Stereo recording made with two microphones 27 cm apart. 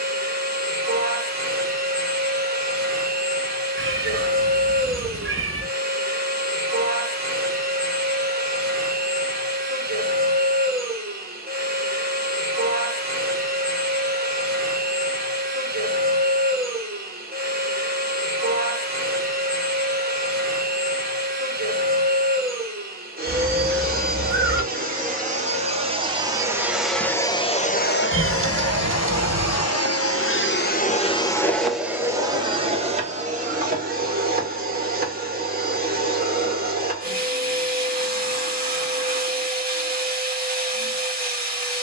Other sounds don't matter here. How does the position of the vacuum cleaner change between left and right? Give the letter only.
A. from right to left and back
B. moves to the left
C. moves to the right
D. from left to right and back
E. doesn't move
A.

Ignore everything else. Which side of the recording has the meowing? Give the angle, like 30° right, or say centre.
50° right.